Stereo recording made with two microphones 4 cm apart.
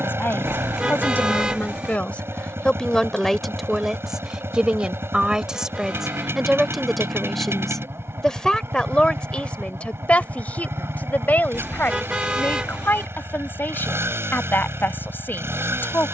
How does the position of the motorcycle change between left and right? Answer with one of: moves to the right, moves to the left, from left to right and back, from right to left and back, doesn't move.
doesn't move.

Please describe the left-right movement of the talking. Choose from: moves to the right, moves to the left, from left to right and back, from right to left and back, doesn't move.
from left to right and back.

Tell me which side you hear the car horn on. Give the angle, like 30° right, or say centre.
20° right.